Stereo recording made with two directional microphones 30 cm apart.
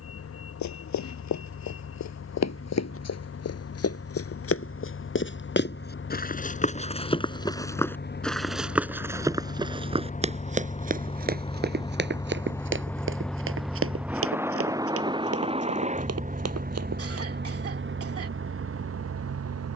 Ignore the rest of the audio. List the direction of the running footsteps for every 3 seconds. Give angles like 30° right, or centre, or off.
60° left, 50° left, 10° left, 20° right, 40° right, 50° right, off.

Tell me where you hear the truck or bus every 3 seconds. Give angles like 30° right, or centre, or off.
50° left, 50° left, 40° left, 20° left, centre, 30° right, 50° right.